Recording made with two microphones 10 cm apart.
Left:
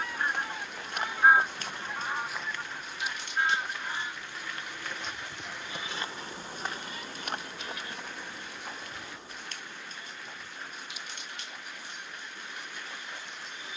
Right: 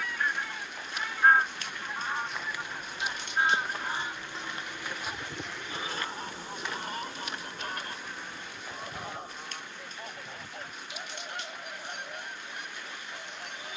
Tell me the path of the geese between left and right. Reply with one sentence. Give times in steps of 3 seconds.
In this clip you hear the geese in the centre from 0 s and on the right from 3 s.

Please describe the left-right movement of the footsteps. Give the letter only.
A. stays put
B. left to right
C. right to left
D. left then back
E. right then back
E.